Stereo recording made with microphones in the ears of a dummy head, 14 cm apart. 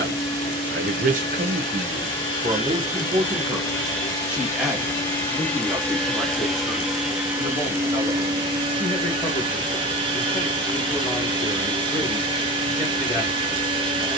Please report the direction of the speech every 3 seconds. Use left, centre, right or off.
right, centre, centre, centre, centre.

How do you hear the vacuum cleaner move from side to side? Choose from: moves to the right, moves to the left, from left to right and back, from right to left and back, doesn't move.
moves to the right.